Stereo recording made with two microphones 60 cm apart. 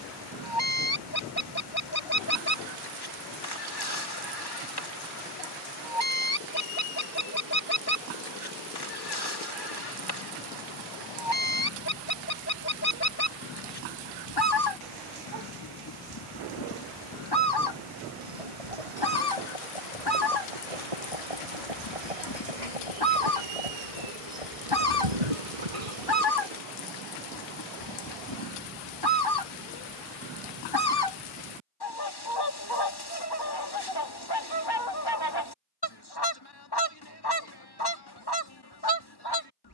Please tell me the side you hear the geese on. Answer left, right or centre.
left.